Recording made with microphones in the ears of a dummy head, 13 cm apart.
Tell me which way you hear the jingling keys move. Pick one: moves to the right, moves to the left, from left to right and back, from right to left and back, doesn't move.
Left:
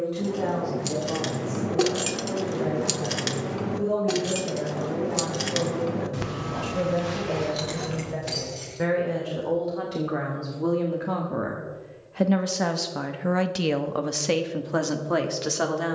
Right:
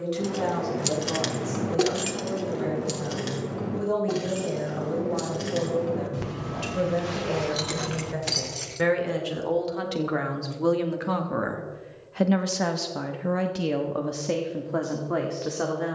from right to left and back.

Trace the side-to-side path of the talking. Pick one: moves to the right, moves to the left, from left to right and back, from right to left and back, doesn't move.
moves to the left.